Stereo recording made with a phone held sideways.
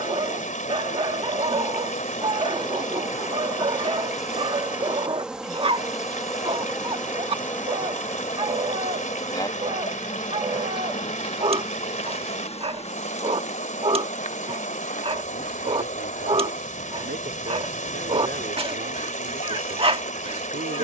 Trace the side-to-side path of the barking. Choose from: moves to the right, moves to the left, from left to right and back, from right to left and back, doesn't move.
doesn't move.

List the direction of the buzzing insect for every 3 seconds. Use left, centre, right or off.
left, centre, centre, left, left, left, left.